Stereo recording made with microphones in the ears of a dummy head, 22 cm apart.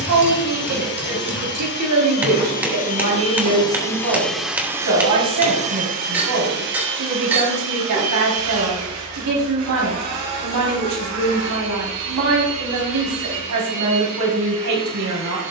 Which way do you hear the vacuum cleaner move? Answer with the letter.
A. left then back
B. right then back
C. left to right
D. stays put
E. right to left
C.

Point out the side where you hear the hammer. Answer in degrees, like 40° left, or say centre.
10° right.